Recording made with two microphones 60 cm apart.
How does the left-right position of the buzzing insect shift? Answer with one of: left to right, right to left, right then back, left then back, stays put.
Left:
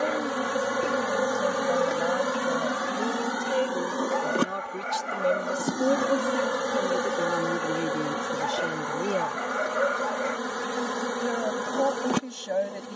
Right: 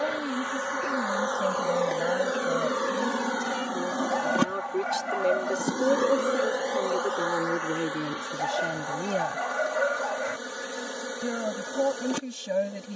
right then back.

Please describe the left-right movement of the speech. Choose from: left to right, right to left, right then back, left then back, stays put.
left then back.